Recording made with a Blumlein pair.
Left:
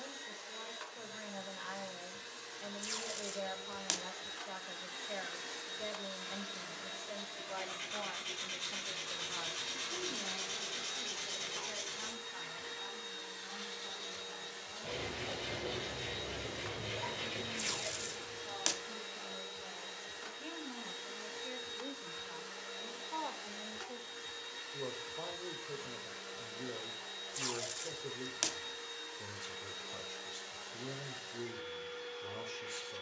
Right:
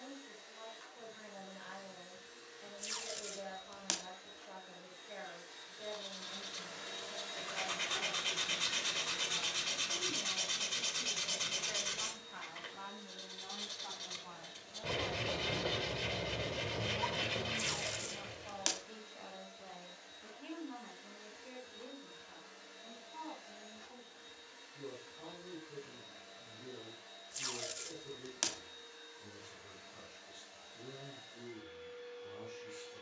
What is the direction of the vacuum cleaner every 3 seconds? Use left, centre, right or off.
left, left, centre, left, left, left, left, left, left, left, left.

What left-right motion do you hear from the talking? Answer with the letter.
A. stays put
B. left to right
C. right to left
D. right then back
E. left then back
D.